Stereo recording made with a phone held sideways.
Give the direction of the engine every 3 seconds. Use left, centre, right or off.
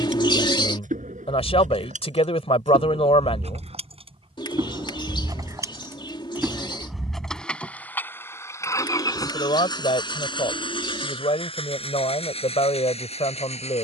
right, right, centre, left, left.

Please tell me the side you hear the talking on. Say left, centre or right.
left.